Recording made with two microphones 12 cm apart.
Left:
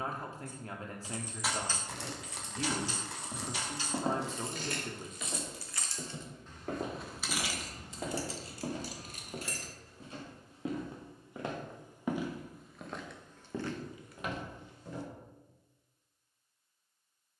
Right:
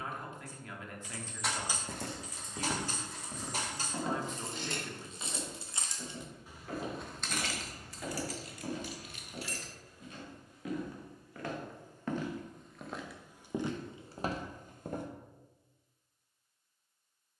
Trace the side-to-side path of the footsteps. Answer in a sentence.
You can hear the footsteps go left and come back.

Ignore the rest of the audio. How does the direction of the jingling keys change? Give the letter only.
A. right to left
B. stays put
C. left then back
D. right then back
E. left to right
D.